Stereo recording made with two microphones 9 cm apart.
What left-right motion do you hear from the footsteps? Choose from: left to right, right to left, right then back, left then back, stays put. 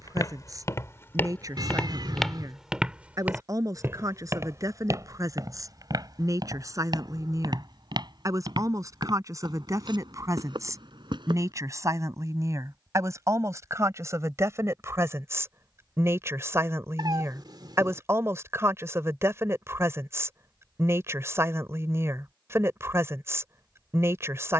left to right.